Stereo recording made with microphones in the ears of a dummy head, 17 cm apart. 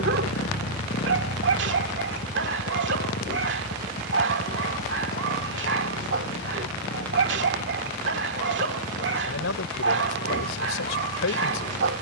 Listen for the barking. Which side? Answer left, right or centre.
right.